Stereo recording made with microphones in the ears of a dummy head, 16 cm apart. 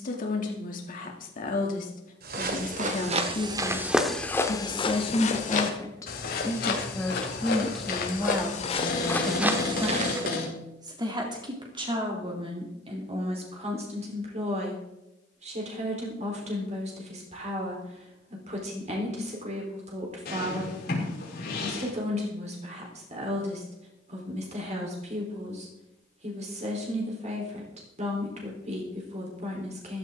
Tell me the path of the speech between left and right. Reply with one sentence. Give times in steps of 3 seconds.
You can hear the speech on the left from 0 s, in the centre from 6 s and on the right from 9 s.